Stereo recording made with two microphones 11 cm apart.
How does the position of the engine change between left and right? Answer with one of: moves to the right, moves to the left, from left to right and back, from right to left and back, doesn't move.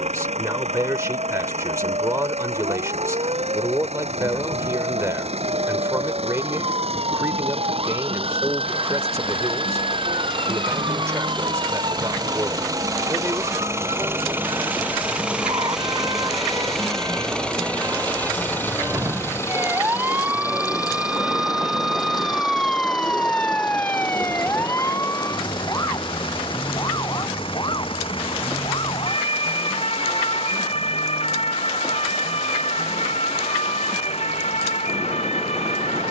moves to the left.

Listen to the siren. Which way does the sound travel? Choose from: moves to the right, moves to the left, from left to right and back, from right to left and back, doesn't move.
moves to the left.